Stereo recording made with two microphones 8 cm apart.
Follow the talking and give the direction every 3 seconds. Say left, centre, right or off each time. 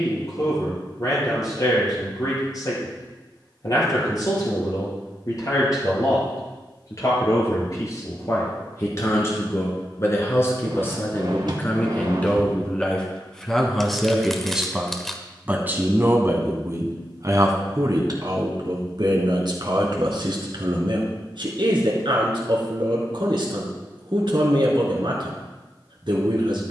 left, left, left, left, centre, right, right, right, right.